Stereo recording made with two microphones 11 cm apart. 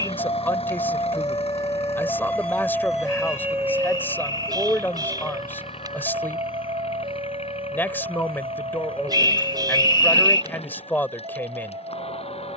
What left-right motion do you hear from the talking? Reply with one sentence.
You can hear the talking stay in one place.